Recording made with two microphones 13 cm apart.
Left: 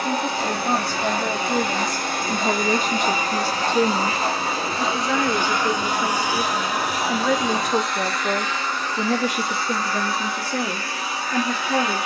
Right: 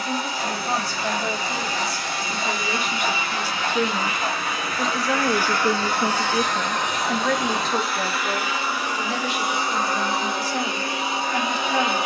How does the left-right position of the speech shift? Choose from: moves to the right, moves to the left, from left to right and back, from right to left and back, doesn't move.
from left to right and back.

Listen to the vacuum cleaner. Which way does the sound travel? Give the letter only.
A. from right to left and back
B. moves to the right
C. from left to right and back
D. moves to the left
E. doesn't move
B.